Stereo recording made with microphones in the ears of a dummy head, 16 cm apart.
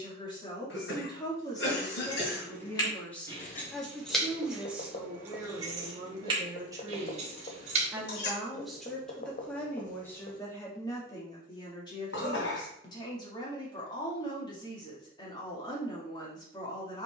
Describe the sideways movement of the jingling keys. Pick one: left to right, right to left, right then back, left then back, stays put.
left to right.